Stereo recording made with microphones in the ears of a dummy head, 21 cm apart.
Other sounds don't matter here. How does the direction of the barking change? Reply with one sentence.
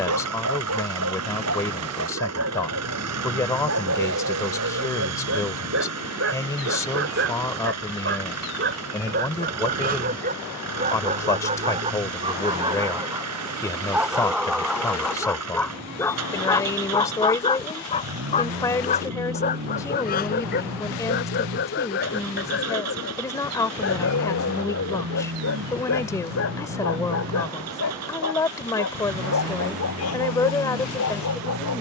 In this clip you hear the barking go from the right side to the left.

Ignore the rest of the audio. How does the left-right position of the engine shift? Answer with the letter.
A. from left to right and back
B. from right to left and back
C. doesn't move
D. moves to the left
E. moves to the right
C.